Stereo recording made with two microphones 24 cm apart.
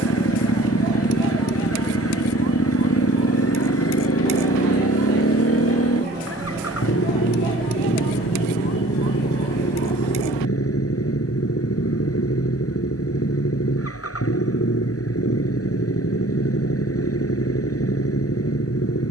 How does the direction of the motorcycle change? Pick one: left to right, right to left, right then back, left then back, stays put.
stays put.